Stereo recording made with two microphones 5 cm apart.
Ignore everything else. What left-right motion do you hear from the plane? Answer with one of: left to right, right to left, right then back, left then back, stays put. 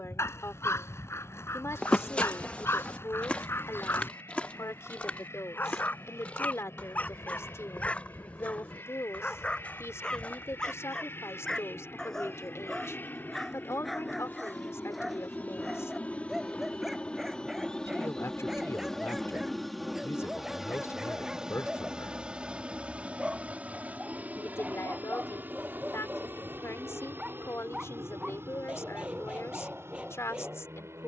left to right.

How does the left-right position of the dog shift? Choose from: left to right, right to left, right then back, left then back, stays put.
left to right.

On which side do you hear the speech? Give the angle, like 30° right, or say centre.
60° left.